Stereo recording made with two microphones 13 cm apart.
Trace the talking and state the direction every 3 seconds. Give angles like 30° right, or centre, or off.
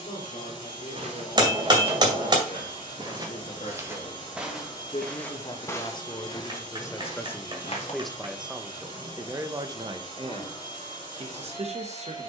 60° left, 40° left, 10° left, 40° right.